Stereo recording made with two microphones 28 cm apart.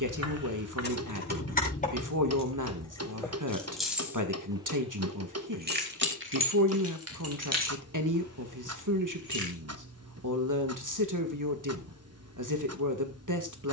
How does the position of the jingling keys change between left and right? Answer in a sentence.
You can hear the jingling keys travel towards the right.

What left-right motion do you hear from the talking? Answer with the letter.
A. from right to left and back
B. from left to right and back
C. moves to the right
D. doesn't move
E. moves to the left
D.